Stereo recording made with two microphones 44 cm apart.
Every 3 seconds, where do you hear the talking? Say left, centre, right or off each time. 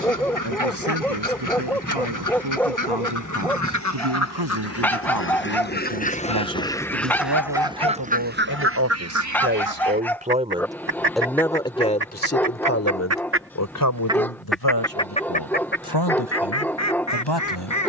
right, right, right, centre, left, left.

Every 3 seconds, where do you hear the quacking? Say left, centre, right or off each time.
left, left, centre, right, right, left.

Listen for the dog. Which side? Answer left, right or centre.
centre.